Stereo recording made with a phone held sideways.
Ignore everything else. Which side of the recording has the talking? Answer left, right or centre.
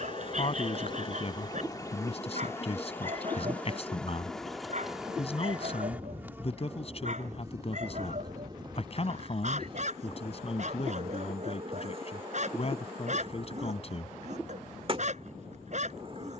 left.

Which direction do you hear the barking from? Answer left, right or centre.
right.